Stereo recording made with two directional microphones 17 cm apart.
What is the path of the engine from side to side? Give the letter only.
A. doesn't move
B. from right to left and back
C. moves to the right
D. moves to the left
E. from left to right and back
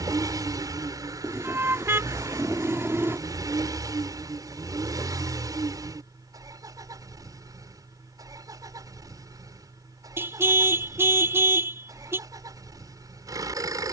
A.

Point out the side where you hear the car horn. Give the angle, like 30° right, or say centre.
10° right.